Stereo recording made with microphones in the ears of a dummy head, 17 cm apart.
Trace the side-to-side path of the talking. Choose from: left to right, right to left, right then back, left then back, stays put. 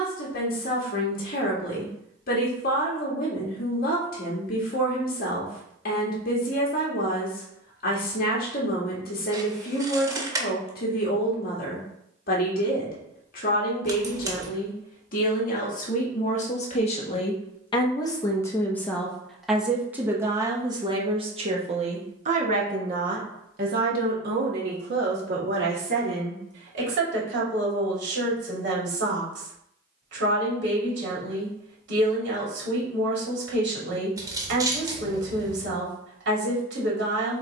left to right.